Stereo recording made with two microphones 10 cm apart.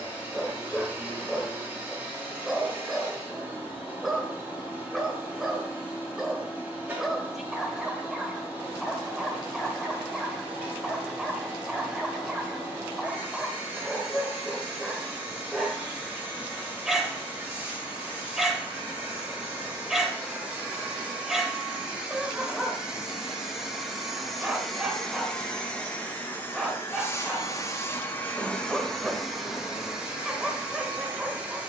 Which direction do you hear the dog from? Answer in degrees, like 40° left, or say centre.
centre.